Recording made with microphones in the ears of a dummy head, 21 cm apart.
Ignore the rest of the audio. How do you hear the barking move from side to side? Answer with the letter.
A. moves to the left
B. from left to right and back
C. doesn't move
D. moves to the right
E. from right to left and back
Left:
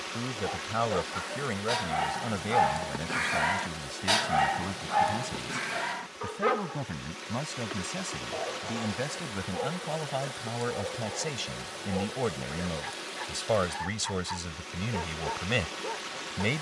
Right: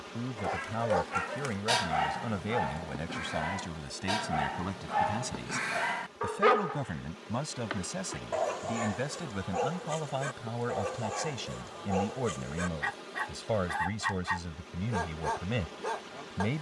E.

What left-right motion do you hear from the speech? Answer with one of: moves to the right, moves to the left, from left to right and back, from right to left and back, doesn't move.
from left to right and back.